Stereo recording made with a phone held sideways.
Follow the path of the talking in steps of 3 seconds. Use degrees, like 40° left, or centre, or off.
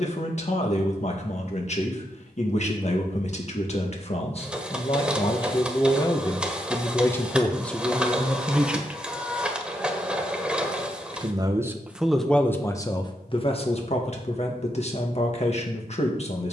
40° left, 40° left, 10° left, 20° right, 30° left, 40° left.